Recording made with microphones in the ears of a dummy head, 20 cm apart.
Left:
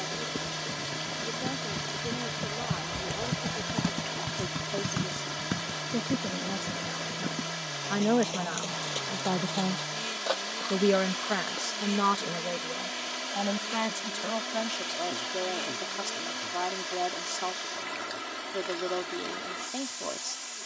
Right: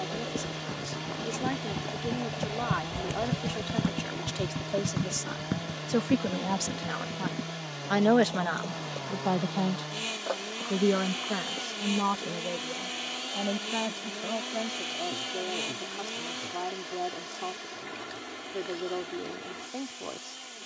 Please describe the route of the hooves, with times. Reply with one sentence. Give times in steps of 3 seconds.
In this clip you hear the hooves on the right from 0 s, on the left from 3 s and not at all from 12 s.